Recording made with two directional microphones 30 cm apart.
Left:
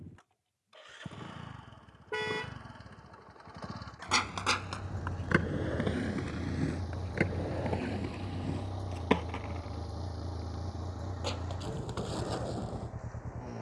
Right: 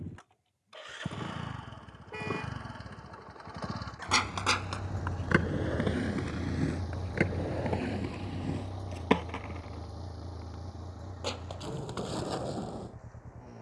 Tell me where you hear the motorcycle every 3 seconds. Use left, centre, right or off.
right, right, centre, left, left.